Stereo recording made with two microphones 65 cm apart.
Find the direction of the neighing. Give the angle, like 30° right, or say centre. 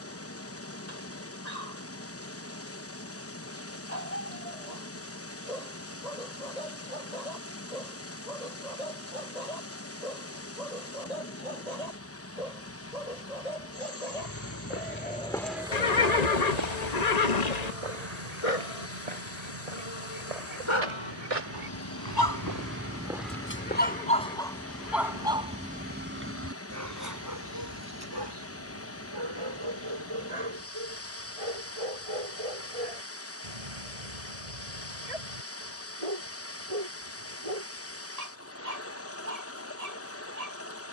80° left.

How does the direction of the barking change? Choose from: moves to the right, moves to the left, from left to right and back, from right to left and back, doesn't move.
moves to the right.